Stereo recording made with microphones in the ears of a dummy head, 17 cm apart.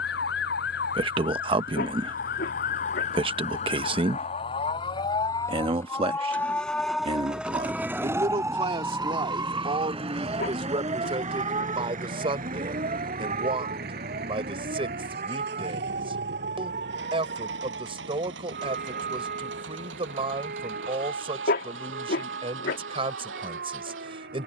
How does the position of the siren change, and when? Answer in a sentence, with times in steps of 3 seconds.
You can hear the siren on the left from 0 s, in the centre from 6 s and on the right from 9 s.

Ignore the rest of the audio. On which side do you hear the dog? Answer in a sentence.
In this clip you hear the dog on the left.